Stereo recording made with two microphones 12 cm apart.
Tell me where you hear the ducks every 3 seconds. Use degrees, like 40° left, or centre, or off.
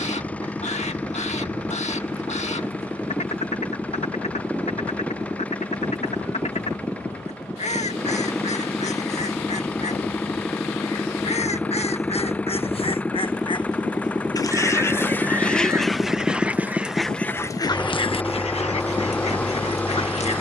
70° left, 70° left, 70° left, 60° left, 40° left, 10° left, 60° left.